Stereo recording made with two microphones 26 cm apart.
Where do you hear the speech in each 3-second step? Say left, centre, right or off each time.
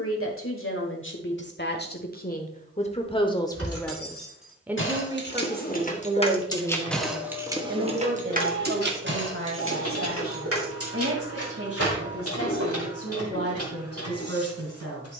left, centre, right, right, right.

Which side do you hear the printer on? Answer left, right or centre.
left.